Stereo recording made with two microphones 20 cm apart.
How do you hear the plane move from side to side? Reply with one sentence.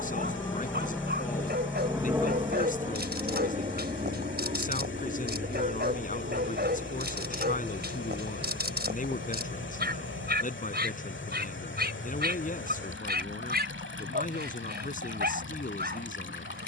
In this clip you hear the plane travel towards the right.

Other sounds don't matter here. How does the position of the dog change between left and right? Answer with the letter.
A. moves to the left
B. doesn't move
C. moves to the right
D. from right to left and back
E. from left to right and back
B.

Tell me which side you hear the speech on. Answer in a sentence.
In this clip you hear the speech on the left.